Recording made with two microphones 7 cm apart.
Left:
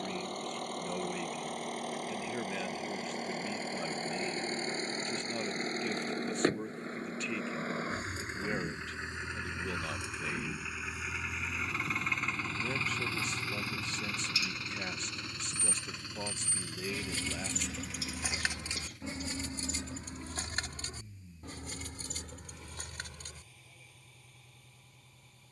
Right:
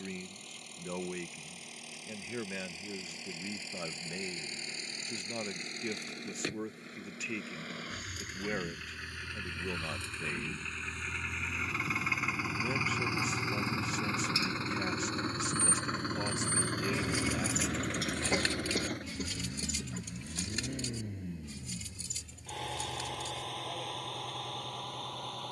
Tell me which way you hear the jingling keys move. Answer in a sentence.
You can hear the jingling keys go from the right side to the left.